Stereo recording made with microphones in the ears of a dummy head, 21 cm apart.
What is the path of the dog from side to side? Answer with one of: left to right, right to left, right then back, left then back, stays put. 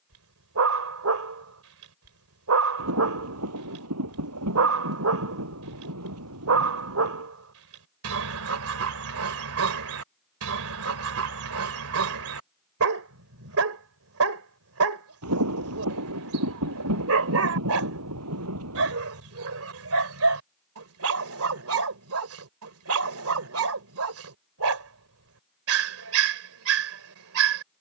stays put.